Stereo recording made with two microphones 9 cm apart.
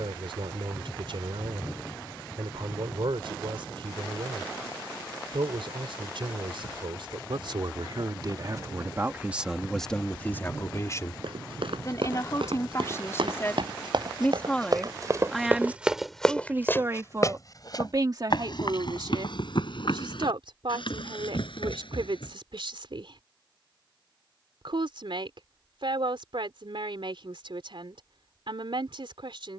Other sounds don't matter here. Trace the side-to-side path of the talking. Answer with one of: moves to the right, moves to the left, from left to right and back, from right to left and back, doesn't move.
from right to left and back.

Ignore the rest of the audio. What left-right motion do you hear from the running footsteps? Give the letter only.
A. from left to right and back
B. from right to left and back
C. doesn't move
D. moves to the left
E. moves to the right
D.